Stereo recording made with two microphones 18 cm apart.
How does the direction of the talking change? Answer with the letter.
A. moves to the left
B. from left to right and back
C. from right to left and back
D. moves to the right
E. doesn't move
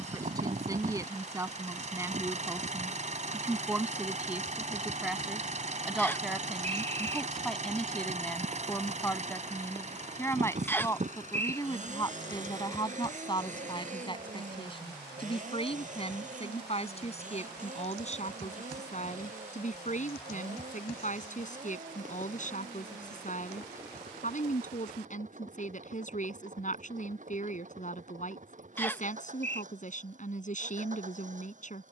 A.